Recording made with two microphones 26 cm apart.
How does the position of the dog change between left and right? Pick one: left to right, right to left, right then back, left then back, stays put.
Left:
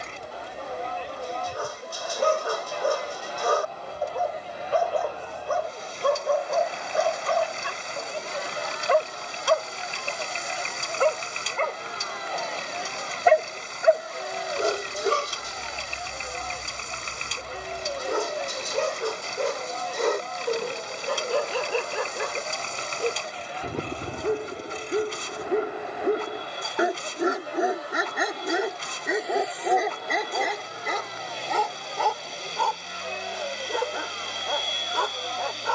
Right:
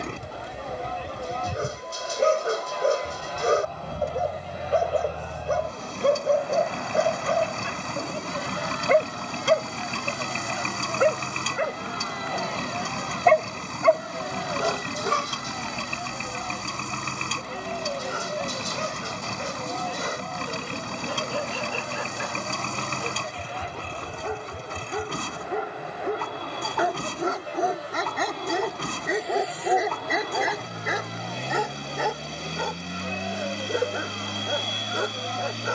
left then back.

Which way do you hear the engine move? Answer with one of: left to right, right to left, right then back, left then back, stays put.
stays put.